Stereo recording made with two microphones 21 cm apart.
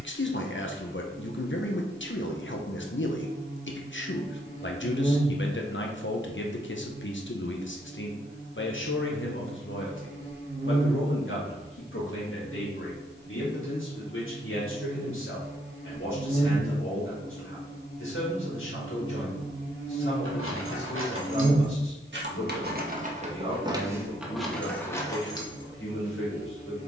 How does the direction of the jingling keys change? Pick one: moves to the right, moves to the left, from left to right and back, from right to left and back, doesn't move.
moves to the left.